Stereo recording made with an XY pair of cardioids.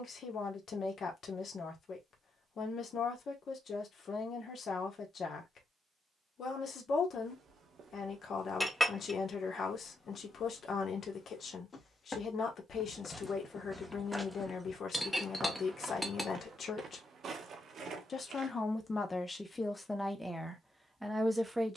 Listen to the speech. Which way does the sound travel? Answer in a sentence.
In this clip you hear the speech move to the right.